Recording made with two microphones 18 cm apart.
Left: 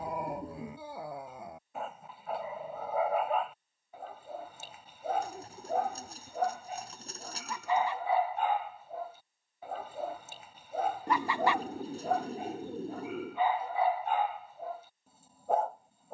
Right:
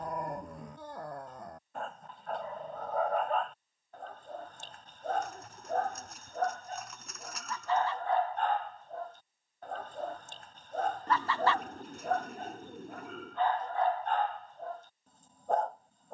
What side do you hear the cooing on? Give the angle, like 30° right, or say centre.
30° left.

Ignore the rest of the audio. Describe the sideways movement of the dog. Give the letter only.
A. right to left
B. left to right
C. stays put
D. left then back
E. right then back
C.